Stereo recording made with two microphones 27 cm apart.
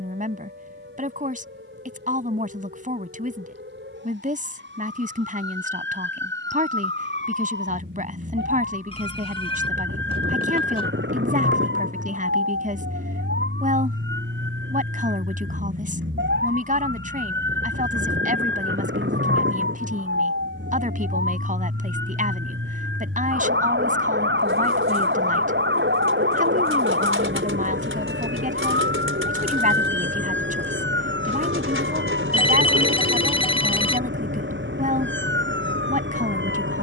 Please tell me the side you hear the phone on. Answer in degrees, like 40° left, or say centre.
20° left.